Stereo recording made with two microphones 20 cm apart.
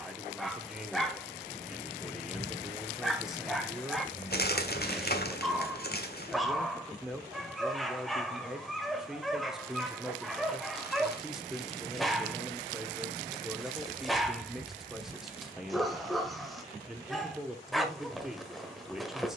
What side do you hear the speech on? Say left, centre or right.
centre.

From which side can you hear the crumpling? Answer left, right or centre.
left.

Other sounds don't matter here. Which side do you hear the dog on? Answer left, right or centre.
centre.